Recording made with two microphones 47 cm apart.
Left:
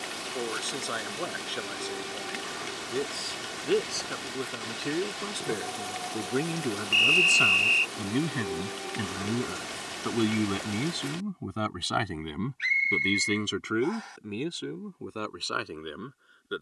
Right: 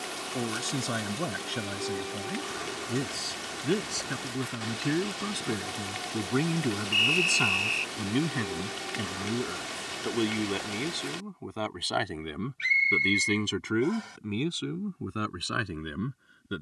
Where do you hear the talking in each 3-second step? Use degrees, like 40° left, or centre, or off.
40° right, 30° right, 10° right, 30° left, 10° right, 40° right.